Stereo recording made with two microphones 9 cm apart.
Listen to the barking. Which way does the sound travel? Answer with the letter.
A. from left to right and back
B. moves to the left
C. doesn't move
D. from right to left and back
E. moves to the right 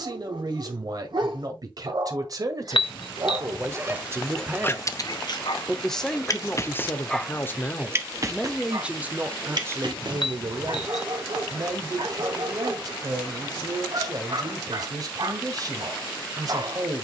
D.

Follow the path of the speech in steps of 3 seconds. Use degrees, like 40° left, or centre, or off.
50° right, 20° right, 10° left, 30° right, 50° right, 50° right.